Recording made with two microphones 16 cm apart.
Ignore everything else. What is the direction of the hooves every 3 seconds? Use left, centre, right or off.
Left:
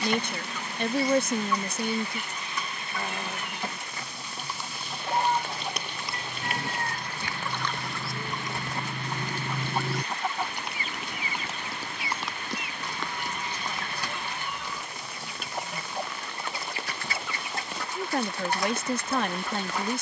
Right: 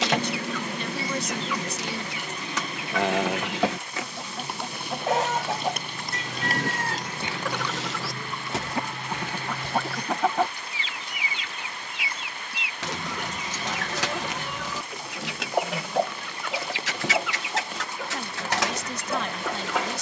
off, right, centre, left, left, off, off.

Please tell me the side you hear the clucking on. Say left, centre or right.
right.